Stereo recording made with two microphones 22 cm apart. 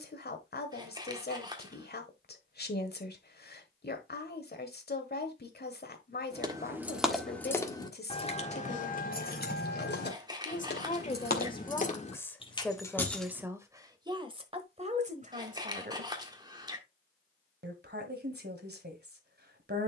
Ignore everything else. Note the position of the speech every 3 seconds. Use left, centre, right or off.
left, left, left, left, centre, right, right.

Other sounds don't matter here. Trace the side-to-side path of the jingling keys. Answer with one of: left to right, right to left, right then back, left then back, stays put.
left then back.